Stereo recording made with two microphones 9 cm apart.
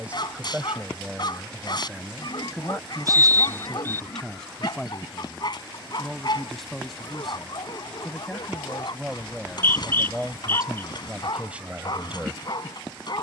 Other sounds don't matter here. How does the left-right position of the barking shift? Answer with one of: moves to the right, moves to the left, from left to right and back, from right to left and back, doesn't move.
doesn't move.